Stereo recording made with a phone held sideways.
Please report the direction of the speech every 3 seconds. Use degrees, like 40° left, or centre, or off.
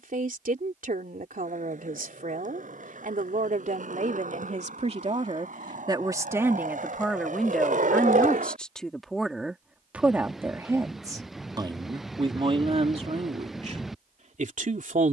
60° right, 50° right, centre, 10° right, 50° right.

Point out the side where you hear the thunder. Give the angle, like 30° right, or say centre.
centre.